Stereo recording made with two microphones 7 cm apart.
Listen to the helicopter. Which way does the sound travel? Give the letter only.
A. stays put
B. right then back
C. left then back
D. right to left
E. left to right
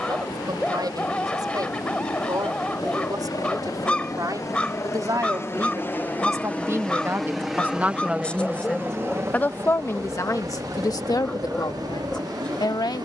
E.